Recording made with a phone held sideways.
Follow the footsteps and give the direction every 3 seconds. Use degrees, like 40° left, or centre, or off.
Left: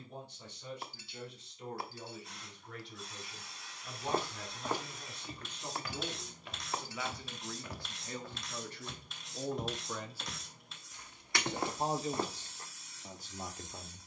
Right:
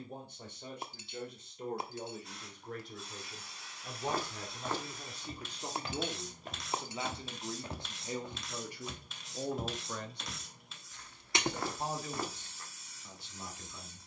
off, 10° left, 30° right, 10° left, 30° left.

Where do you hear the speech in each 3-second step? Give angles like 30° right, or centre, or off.
50° right, 40° right, 20° right, 10° left, 40° left.